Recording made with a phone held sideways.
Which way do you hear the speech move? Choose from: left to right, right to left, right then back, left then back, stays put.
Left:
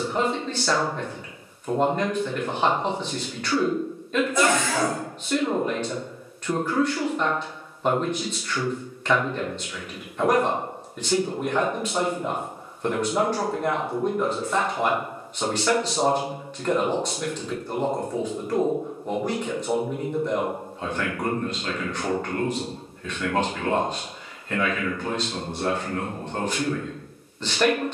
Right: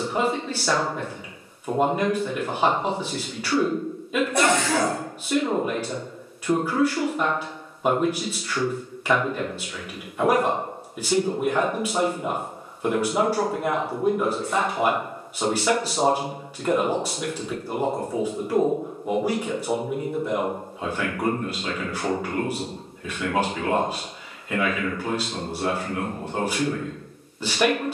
stays put.